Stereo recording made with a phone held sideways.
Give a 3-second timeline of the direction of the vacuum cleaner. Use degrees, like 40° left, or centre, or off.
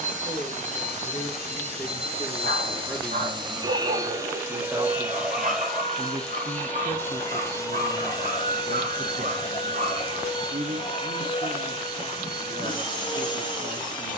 40° right, 20° right, 20° left, 30° left, 30° left.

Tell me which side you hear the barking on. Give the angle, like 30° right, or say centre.
60° right.